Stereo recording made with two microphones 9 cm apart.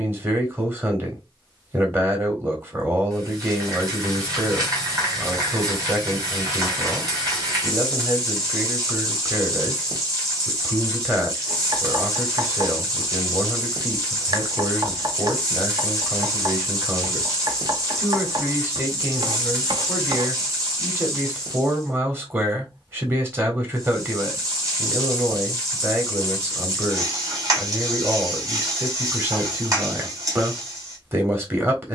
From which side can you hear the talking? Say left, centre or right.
right.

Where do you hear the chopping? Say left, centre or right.
right.